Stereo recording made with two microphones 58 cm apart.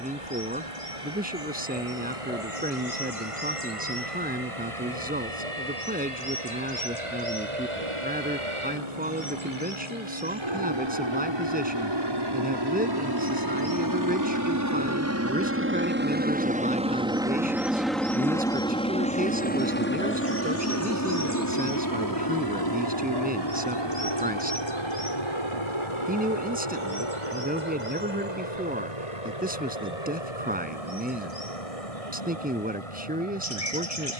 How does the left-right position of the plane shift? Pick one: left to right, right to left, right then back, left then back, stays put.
right to left.